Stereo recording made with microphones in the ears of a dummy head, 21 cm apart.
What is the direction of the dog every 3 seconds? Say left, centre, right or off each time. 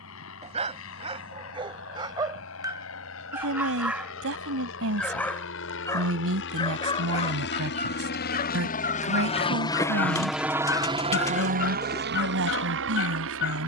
right, centre, left, left, left.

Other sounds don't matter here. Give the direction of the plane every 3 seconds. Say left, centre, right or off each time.
left, left, left, centre, right.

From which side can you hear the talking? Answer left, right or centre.
right.